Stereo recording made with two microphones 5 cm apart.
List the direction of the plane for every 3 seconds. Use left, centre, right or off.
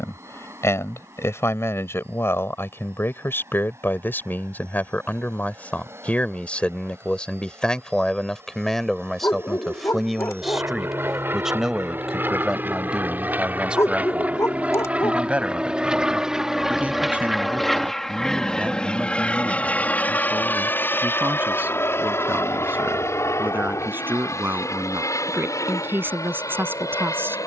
right, right, right, right, right, centre, left, left, left.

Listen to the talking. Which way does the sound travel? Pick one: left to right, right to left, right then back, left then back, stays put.
left to right.